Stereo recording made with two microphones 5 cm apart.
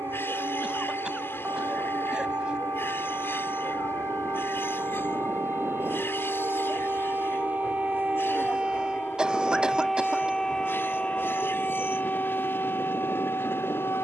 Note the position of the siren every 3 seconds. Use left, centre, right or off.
right, right, right, centre, left.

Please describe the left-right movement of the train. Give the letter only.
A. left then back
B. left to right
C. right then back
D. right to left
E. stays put
E.